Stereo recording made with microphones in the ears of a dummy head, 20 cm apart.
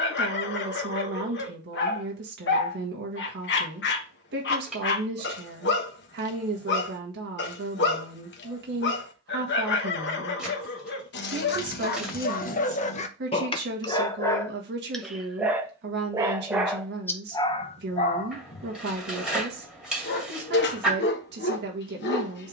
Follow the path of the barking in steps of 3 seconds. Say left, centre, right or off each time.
left, left, left, left, left, centre, left, left.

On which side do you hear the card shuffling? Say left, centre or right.
centre.